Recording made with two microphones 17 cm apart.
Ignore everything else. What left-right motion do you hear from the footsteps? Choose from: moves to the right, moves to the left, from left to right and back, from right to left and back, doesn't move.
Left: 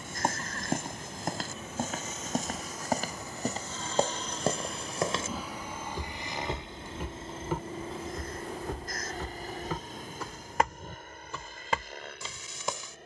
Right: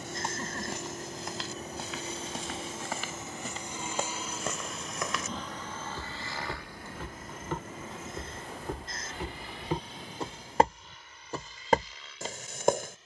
moves to the right.